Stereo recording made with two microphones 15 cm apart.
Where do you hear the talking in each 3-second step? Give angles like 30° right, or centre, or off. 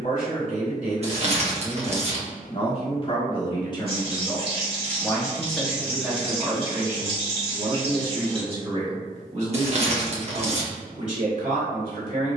50° left, 20° left, 30° right, 50° right.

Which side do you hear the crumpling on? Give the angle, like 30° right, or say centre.
50° right.